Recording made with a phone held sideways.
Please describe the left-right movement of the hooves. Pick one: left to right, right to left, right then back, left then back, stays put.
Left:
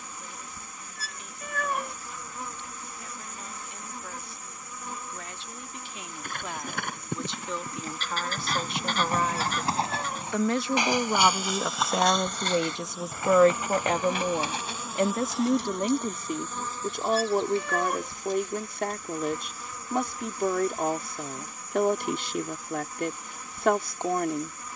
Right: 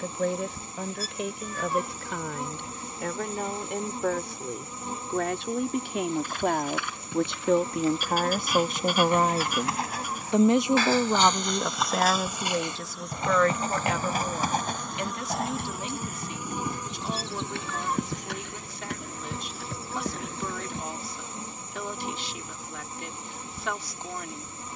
left to right.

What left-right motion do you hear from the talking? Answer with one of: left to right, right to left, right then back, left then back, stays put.
right to left.